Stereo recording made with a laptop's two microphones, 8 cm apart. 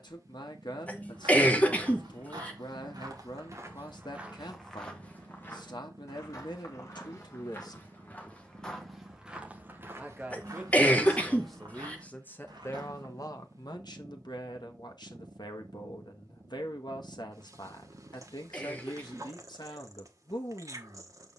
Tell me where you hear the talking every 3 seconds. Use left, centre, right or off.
left, left, left, centre, left, left, left.